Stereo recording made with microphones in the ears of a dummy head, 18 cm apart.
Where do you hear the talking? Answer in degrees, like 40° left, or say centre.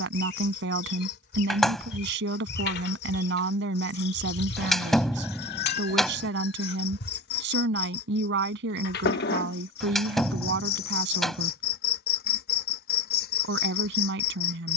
60° right.